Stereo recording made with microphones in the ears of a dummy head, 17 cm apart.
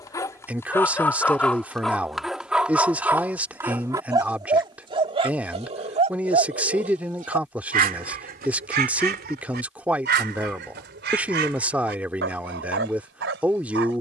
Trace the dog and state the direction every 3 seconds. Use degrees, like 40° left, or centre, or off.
10° left, 20° right, 50° right, 60° right, 70° right.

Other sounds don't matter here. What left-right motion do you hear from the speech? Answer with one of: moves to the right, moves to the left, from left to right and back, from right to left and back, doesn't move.
doesn't move.